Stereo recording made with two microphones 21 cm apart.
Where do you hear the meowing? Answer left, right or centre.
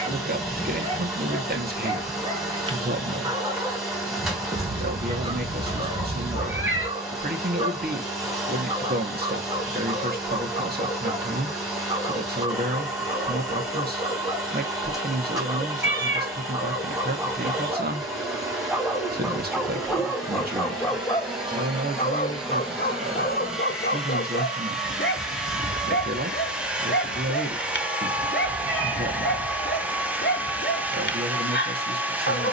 right.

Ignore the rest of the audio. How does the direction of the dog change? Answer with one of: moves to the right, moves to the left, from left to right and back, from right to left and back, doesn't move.
moves to the left.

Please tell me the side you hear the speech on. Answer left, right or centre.
right.